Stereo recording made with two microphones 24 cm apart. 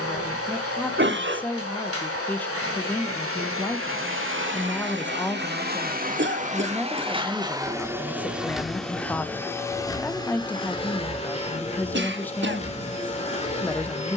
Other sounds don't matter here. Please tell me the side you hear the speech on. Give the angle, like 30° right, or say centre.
10° left.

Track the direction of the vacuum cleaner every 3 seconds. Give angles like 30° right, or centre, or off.
70° right, 50° right, 20° right, 20° left, 30° left.